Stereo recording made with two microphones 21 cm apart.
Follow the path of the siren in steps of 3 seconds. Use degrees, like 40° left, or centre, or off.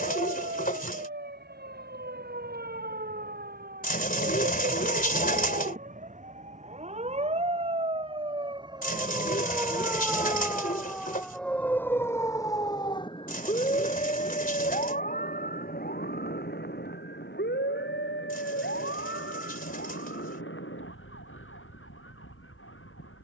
50° right, 40° right, 30° right, centre, 30° left, 50° left, 60° left, 70° left.